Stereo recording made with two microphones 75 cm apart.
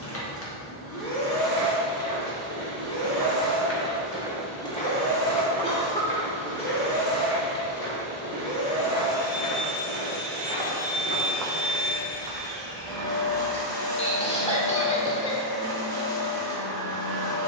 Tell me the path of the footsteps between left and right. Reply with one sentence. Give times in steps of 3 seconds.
In this clip you hear the footsteps on the right from 0 s, in the centre from 3 s, on the left from 6 s, on the right from 12 s and not at all from 15 s.